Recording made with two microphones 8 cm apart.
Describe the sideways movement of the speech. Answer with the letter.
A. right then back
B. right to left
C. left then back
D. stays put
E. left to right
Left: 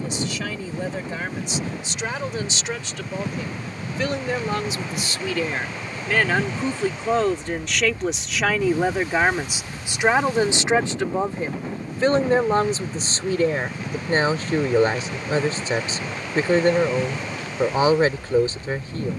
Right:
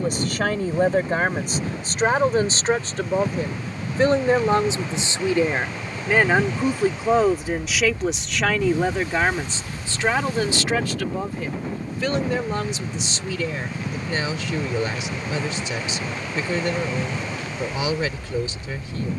B.